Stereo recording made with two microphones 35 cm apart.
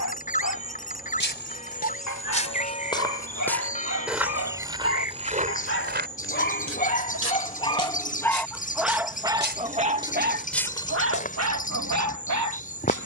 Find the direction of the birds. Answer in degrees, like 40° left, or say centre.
20° left.